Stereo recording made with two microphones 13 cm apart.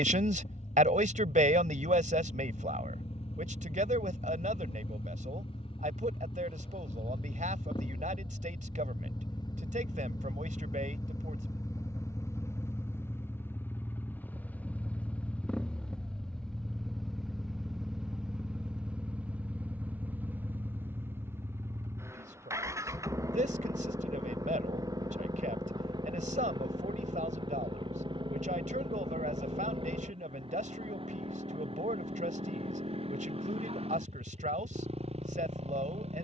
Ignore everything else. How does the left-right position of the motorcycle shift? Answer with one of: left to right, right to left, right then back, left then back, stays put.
left to right.